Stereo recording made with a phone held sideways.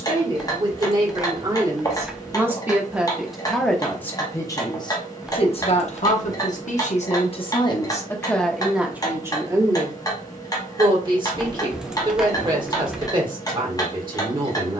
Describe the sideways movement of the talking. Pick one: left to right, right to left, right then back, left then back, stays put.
left then back.